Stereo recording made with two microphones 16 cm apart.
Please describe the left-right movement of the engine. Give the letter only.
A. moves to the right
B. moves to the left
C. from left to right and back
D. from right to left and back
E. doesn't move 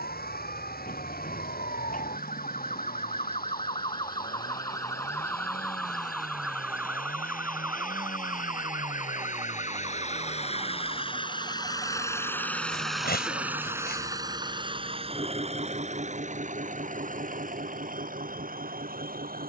A.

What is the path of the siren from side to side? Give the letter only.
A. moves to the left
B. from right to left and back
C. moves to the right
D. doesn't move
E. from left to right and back
C.